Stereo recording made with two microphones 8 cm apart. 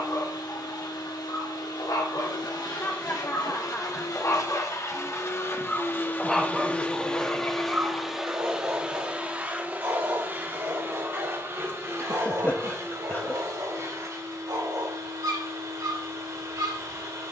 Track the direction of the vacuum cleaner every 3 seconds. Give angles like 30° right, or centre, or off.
70° left, 50° left, 10° left, 30° right, 50° right, 50° right.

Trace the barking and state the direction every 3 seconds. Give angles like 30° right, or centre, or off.
60° left, 30° left, 20° right, 50° right, 60° right, 60° right.